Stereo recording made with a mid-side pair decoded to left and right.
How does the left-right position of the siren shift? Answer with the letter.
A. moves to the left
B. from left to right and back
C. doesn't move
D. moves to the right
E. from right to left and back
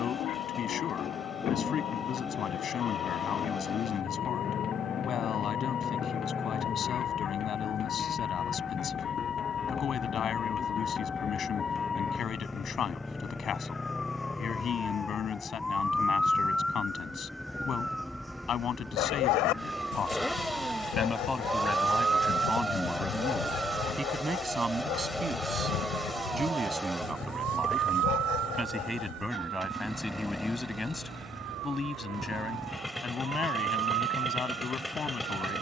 D.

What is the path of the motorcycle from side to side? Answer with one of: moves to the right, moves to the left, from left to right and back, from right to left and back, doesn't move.
doesn't move.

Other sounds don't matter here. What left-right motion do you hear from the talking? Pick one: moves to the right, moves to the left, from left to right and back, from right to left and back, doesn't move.
from left to right and back.